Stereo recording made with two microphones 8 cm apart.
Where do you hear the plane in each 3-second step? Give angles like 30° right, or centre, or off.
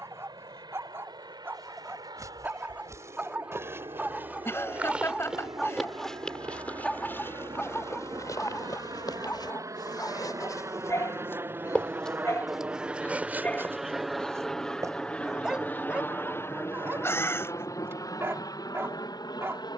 70° right, 60° right, 50° right, 40° right, 10° right, 30° left, 50° left.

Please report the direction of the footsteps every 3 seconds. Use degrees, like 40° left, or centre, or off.
40° right, 20° right, 30° left, 40° left, 20° right, off, off.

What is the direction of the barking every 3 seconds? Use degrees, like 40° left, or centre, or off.
30° right, 10° right, 20° left, 40° left, 20° left, 20° right, 30° right.